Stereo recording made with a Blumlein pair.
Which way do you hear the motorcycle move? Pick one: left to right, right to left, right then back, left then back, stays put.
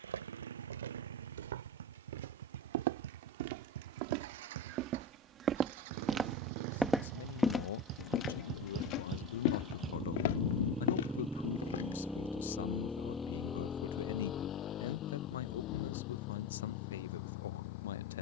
right to left.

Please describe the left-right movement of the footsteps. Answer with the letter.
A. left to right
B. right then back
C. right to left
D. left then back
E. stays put
C.